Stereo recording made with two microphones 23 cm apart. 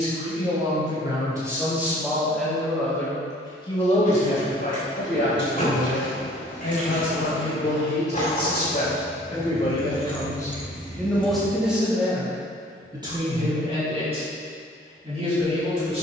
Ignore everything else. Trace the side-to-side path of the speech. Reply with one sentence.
You can hear the speech go left and come back.